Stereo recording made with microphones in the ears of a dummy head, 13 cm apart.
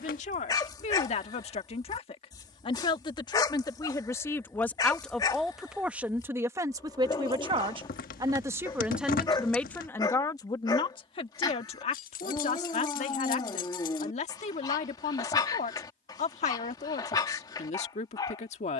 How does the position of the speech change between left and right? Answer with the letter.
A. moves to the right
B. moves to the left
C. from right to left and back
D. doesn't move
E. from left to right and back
E.